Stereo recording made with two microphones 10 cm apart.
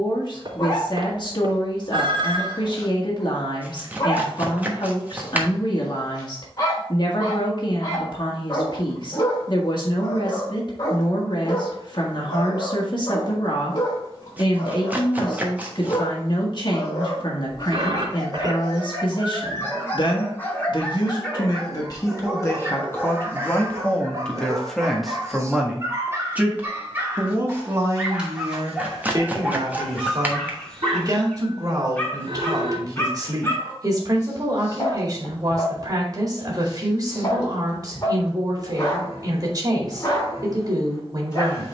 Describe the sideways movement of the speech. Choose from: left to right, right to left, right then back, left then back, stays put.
left to right.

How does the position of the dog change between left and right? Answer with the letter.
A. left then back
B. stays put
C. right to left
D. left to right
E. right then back
E.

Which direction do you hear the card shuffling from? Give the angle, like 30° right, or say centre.
20° right.